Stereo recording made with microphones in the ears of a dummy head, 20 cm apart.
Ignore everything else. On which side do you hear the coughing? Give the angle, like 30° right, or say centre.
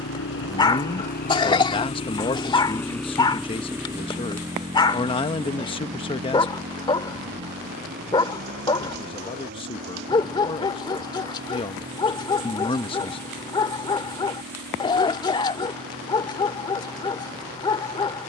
20° left.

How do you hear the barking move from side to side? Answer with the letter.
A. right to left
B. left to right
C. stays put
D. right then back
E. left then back
C.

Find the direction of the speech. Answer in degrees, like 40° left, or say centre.
20° left.